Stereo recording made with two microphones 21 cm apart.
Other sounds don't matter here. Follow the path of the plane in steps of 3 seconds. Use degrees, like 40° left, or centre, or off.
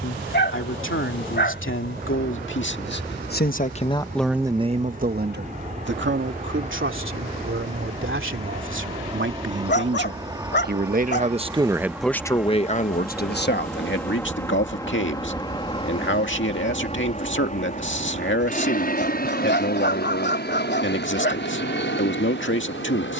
50° right, 40° right, 30° right, 20° right, centre, 30° left, 40° left, 60° left.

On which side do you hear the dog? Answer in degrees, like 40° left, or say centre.
60° left.